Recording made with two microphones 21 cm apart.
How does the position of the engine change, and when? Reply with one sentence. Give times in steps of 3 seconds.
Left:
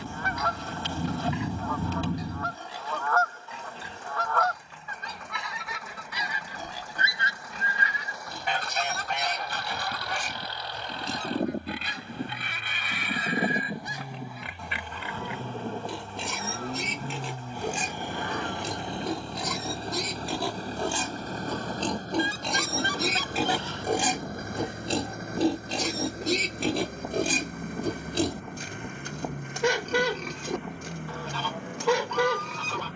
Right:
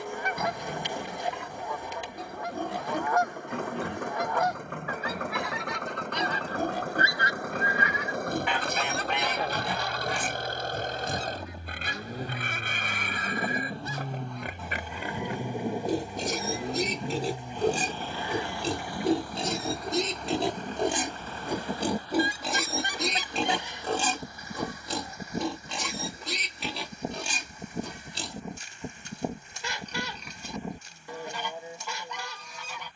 In this clip you hear the engine on the right from 0 s, in the centre from 15 s and on the left from 18 s.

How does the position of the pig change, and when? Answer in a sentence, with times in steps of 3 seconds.
In this clip you hear the pig on the right from 0 s, in the centre from 21 s and on the left from 24 s.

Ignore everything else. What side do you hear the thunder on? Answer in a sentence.
In this clip you hear the thunder on the left.